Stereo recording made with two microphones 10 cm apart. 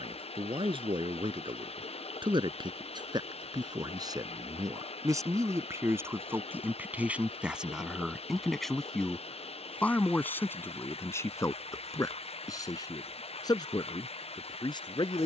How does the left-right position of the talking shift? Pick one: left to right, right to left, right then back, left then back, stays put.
right to left.